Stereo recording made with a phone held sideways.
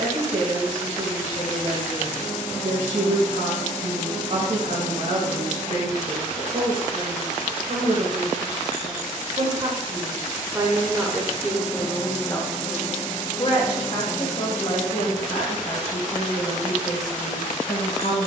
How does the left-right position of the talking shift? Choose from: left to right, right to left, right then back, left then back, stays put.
right to left.